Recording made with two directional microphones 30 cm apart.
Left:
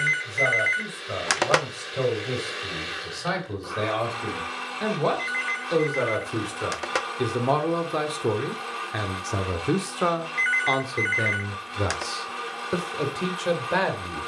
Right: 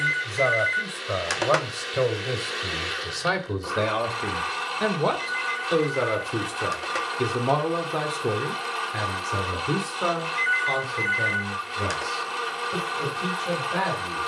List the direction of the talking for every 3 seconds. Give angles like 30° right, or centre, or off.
40° right, 30° right, centre, 40° left, 60° left.